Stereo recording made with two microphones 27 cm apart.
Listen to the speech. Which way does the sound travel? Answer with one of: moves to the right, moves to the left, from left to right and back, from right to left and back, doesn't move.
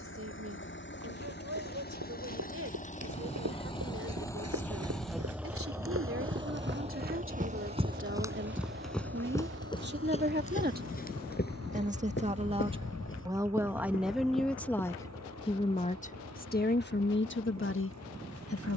moves to the left.